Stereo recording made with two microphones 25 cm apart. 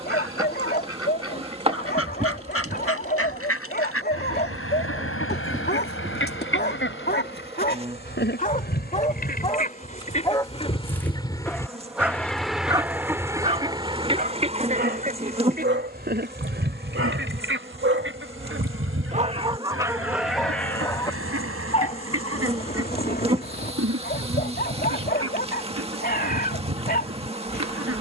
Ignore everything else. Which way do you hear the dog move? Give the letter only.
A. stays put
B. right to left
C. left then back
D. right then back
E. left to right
D.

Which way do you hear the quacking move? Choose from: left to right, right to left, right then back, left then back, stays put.
left to right.